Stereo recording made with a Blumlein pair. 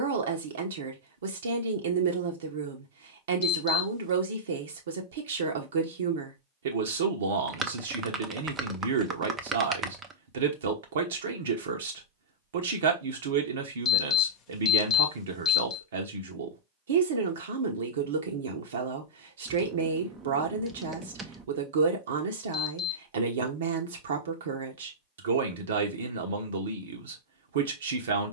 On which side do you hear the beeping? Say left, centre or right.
left.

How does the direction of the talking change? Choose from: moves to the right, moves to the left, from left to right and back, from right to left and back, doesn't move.
doesn't move.